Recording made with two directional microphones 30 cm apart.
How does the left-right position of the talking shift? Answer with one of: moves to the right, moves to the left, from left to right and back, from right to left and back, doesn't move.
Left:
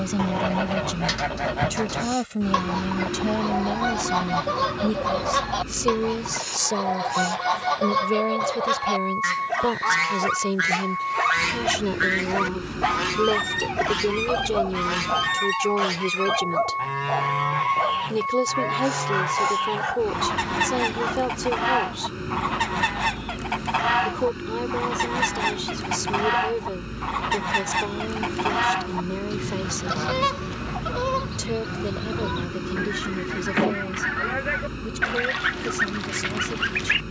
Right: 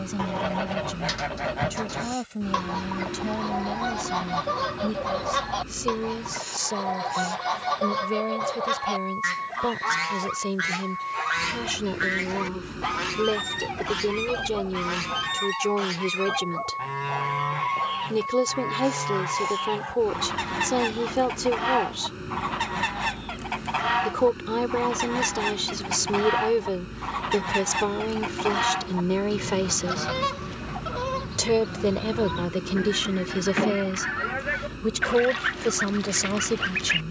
moves to the right.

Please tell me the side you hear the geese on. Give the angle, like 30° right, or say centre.
20° left.